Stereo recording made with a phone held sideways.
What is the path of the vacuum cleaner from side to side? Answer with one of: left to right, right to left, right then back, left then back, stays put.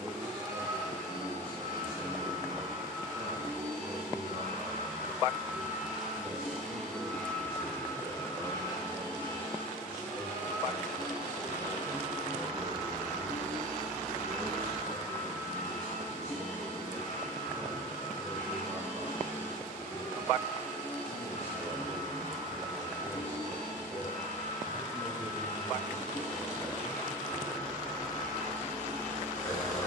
right to left.